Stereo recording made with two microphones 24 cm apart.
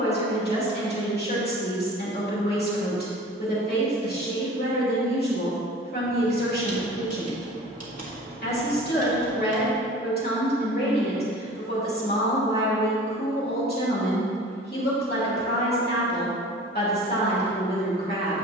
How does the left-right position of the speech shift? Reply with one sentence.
In this clip you hear the speech stay put.